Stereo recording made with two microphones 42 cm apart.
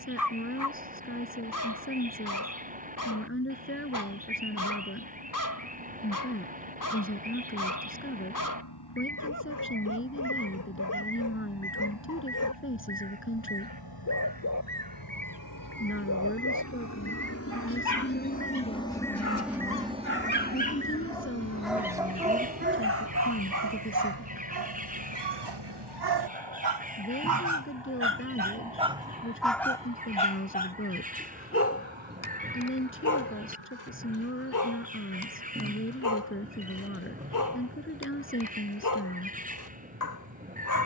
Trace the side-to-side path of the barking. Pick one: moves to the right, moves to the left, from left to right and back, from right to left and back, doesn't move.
from left to right and back.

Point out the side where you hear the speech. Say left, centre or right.
left.